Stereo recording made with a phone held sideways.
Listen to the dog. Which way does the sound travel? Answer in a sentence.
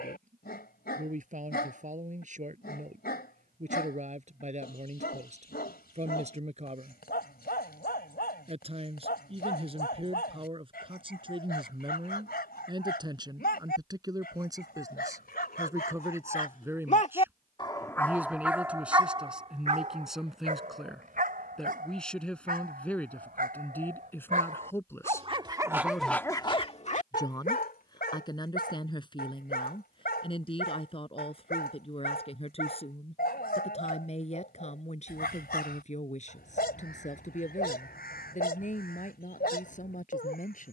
You can hear the dog move from left to right and back again.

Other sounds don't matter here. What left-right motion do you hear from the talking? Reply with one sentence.
You can hear the talking go from the right side to the left.